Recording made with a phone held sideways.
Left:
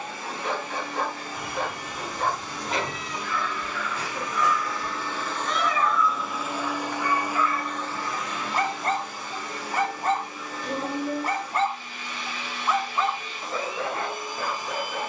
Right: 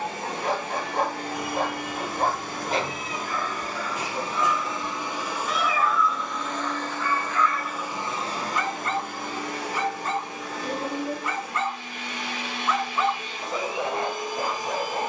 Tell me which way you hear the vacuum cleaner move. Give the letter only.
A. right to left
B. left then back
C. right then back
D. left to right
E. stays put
B.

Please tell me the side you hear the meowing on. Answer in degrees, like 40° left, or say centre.
centre.